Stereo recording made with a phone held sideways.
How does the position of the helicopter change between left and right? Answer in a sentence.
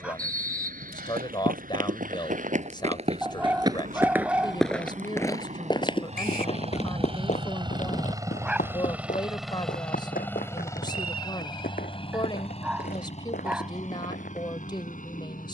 In this clip you hear the helicopter move to the left.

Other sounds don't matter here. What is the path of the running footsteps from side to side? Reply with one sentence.
You can hear the running footsteps move from right to left.